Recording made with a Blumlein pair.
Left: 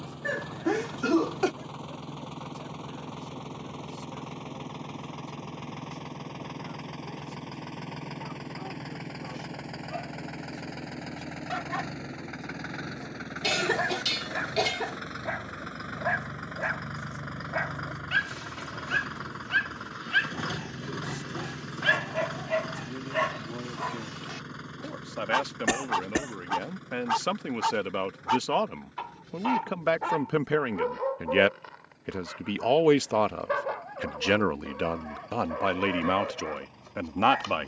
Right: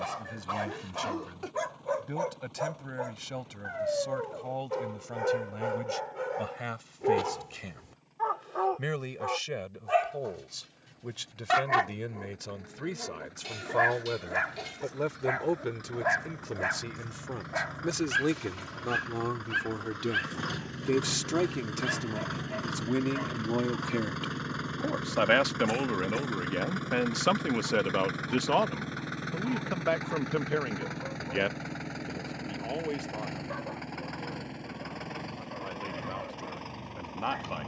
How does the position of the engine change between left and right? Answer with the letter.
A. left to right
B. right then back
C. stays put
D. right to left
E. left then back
A.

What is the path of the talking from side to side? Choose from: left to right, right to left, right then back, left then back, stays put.
right to left.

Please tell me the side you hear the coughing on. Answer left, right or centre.
left.